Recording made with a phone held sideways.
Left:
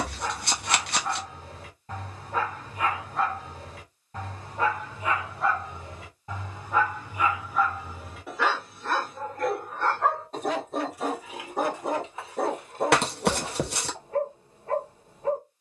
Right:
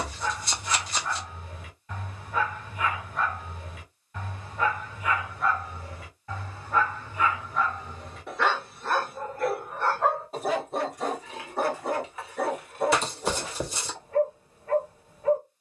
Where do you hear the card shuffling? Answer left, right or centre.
left.